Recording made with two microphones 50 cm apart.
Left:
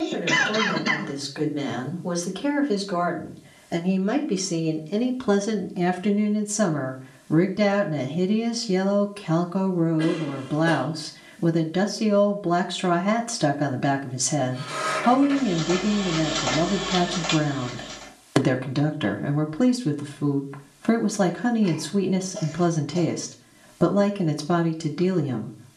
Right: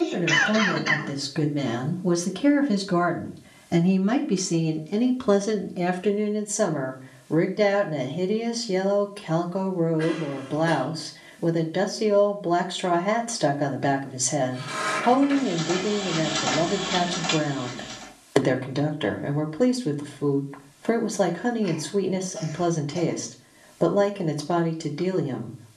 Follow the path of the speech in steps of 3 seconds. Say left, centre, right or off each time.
right, centre, left, left, left, left, left, left, left.